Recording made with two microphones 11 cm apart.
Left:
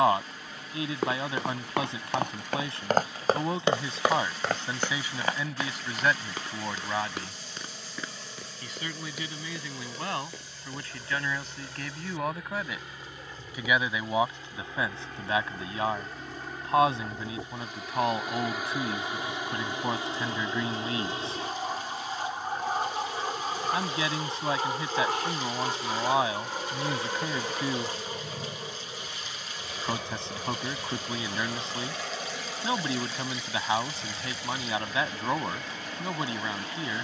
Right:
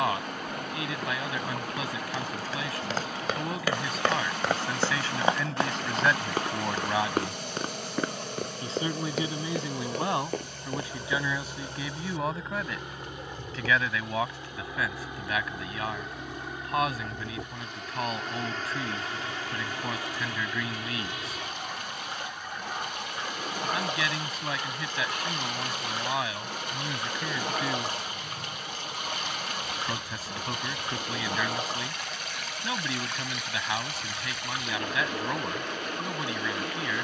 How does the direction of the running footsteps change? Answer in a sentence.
In this clip you hear the running footsteps move from left to right.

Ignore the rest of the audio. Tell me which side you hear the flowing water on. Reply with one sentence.
You can hear the flowing water on the right.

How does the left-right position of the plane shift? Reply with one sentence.
In this clip you hear the plane move to the left.